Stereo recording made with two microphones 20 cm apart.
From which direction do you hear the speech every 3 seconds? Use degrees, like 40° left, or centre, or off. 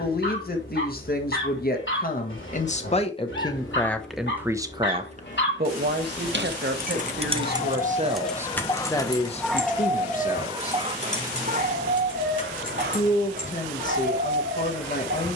40° left, 10° right, 40° right, 40° left, 40° left.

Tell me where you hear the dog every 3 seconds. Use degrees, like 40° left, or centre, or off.
70° left, 60° left, 40° left, 20° right, 60° right.